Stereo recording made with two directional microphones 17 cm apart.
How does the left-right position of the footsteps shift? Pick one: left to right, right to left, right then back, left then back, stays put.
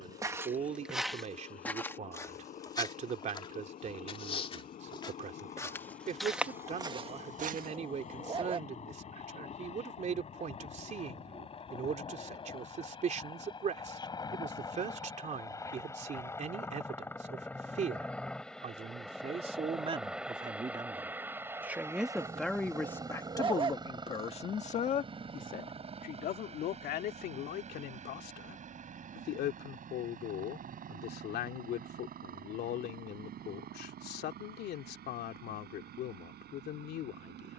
left then back.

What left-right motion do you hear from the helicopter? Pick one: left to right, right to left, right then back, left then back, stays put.
left to right.